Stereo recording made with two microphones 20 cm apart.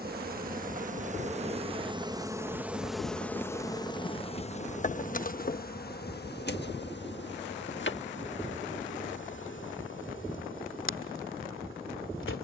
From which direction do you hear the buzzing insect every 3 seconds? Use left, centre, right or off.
right, left, left, left.